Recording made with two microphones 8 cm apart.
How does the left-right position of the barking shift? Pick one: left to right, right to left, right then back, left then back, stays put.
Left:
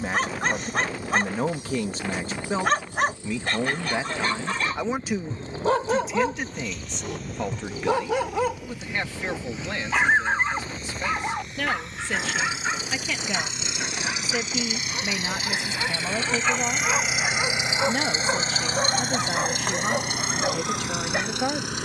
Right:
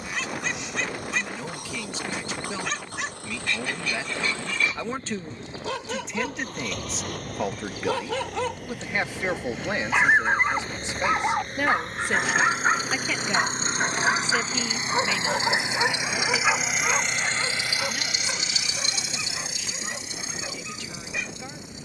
right then back.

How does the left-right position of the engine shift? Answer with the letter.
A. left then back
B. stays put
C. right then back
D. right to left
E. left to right
D.